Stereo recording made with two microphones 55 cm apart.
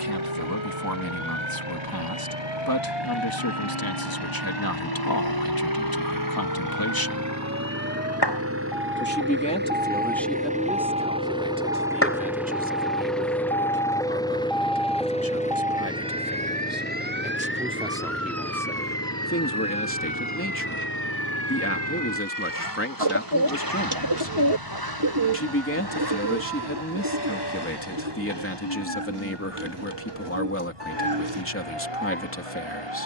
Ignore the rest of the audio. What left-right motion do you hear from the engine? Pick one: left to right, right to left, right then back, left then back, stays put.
right to left.